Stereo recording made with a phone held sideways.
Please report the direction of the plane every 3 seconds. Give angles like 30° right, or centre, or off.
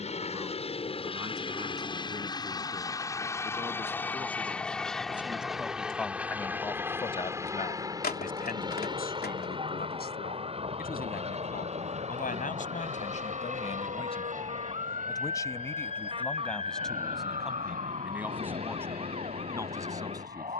30° left, 10° left, 20° right, 30° right, 50° right, 50° right, 60° right.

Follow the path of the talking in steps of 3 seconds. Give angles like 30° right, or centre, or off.
20° right, 10° right, 40° left, 70° left, 50° left, 10° left, 20° right.